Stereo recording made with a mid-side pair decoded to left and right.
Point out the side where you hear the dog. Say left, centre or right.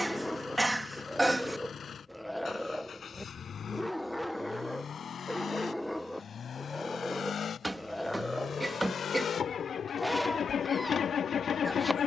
centre.